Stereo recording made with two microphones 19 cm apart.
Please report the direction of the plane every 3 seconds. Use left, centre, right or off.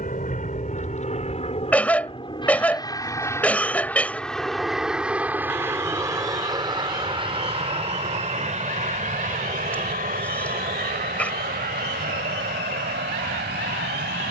left, centre, right, right, right.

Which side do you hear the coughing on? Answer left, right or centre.
centre.